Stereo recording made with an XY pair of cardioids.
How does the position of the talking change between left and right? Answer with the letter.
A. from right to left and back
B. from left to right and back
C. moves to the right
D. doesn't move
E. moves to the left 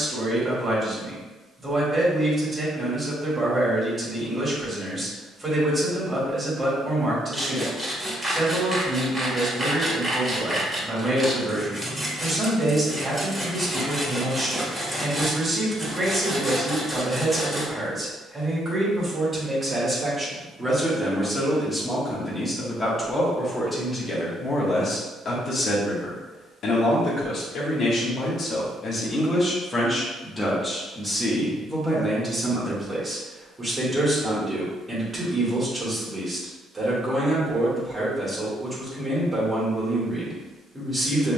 A.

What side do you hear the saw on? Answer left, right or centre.
centre.